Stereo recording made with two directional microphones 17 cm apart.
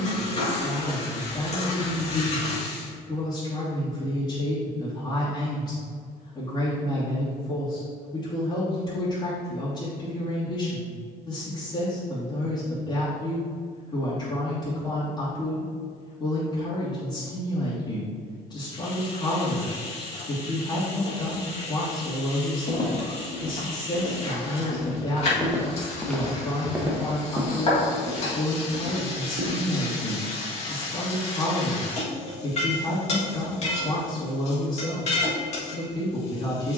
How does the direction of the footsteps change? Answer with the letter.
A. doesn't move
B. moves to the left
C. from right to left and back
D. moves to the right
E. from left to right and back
D.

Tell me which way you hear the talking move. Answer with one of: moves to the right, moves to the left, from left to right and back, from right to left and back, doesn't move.
doesn't move.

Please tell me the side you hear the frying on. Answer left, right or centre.
left.